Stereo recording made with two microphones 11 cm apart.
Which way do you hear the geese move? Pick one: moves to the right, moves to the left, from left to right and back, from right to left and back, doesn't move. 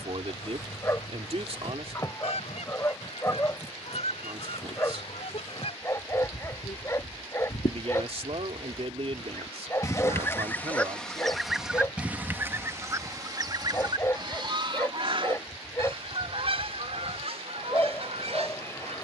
moves to the right.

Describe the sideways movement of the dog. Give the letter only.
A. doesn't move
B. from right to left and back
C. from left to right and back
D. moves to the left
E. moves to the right
A.